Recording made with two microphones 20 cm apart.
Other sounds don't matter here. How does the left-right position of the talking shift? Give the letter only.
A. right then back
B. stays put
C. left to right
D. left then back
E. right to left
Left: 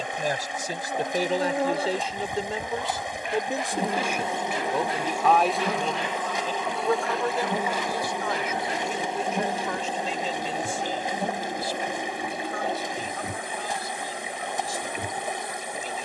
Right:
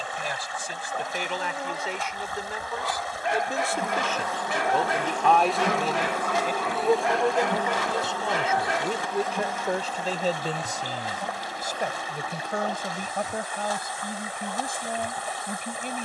C.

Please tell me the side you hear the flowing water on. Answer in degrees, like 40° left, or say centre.
20° left.